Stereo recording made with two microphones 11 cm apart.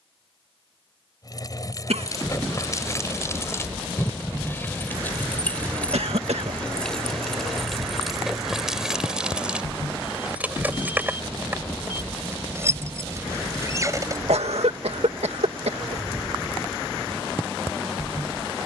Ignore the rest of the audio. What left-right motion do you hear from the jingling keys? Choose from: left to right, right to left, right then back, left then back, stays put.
left to right.